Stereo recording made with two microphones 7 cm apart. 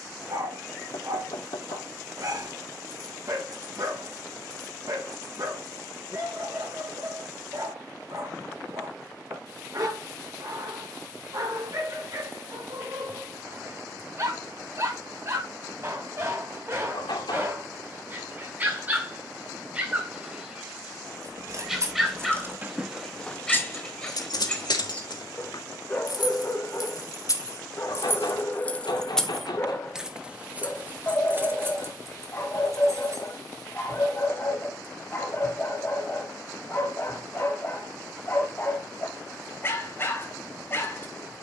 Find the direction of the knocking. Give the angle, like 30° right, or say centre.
80° left.